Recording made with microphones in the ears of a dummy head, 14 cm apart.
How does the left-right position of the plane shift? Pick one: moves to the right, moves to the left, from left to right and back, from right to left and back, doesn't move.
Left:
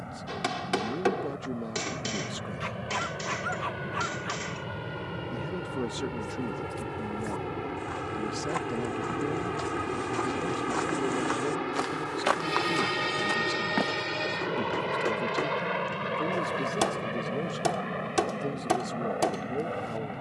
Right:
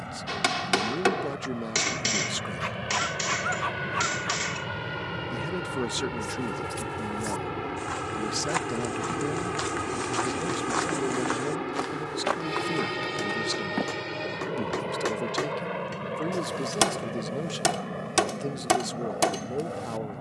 moves to the left.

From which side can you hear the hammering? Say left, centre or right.
right.